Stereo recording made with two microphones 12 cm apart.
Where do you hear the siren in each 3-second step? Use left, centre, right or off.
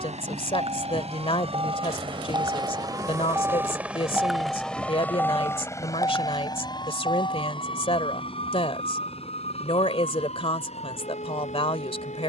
right, centre, left, left.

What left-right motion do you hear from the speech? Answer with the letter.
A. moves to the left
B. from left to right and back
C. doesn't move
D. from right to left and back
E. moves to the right
C.